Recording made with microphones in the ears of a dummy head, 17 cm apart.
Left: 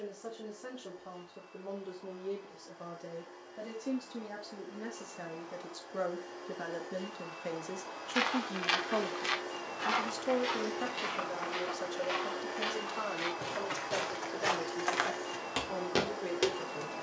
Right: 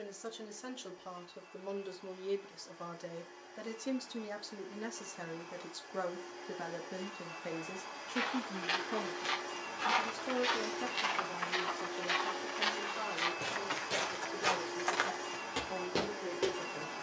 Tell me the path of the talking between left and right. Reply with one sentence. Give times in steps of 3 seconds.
In this clip you hear the talking on the right from 0 s, in the centre from 6 s and on the left from 9 s.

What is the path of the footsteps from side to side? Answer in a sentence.
You can hear the footsteps move from left to right and back again.